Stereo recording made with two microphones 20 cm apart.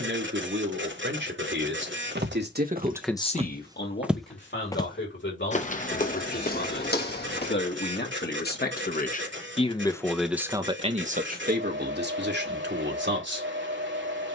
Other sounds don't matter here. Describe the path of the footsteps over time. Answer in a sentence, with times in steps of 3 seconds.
You can hear the footsteps on the right from 0 s, in the centre from 3 s, on the left from 6 s and not at all from 9 s.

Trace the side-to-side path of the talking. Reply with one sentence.
You can hear the talking go left and come back.